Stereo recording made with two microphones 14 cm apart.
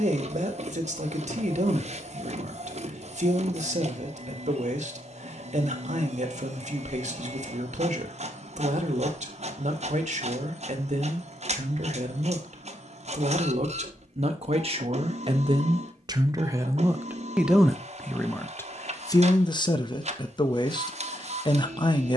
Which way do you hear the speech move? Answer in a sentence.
In this clip you hear the speech travel towards the left.